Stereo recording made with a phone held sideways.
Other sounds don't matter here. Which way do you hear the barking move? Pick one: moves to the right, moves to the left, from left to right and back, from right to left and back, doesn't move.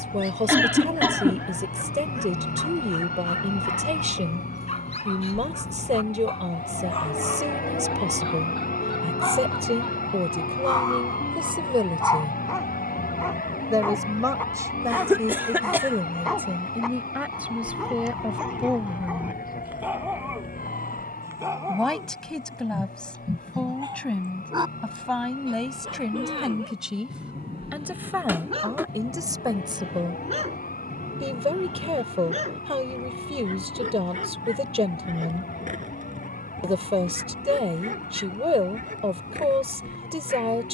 moves to the right.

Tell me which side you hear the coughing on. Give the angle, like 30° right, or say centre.
10° right.